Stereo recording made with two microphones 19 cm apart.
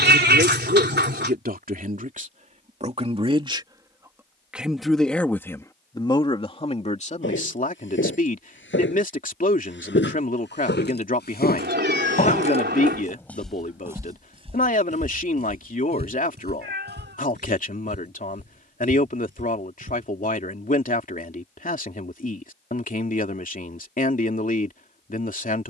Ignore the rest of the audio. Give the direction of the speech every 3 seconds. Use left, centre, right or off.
right, centre, left, left, left, left, left, left, left.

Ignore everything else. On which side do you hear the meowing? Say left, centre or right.
right.